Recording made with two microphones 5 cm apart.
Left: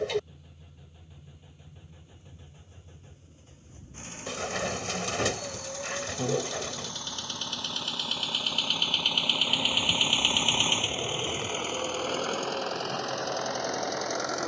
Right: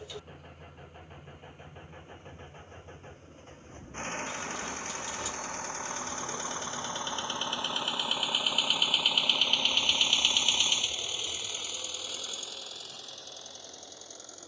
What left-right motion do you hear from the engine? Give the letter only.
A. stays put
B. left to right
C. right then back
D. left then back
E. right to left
E.